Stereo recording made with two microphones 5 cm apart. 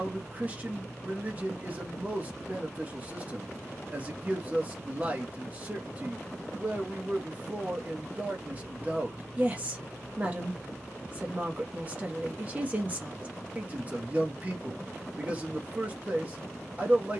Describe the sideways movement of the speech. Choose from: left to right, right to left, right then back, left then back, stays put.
stays put.